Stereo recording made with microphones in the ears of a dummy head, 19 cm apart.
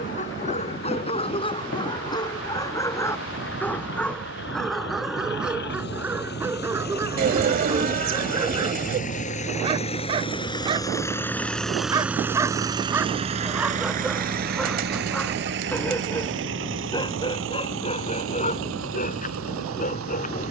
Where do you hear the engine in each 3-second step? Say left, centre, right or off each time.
left, left, left, left, right, right, right.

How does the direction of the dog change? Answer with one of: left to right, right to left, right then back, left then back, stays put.
right then back.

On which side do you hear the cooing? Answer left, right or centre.
right.